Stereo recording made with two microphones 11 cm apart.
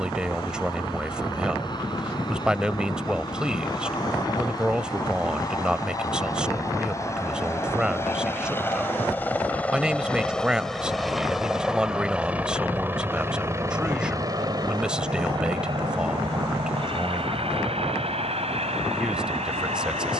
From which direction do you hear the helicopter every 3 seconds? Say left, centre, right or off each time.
left, left, left, centre, right, right, right.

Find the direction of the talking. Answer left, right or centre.
centre.